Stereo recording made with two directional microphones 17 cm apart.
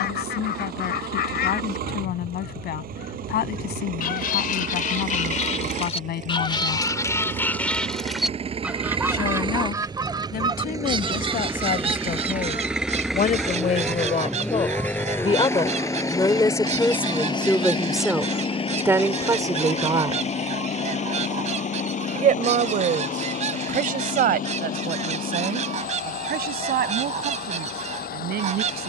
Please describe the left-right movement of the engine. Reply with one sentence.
In this clip you hear the engine travel towards the left.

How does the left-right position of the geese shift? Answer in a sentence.
In this clip you hear the geese travel towards the right.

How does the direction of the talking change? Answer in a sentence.
In this clip you hear the talking move from left to right.